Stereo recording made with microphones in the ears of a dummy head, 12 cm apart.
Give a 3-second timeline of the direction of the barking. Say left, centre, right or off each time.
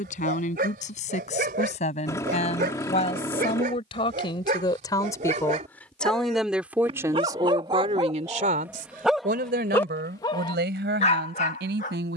right, right, right, left.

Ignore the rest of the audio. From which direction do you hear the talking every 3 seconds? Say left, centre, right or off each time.
left, left, right, right.